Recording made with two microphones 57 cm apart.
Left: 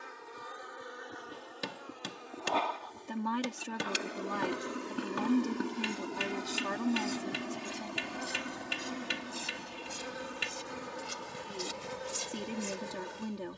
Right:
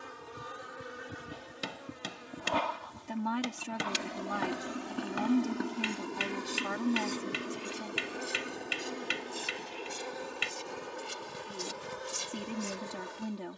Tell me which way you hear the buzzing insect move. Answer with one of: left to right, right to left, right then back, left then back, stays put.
right to left.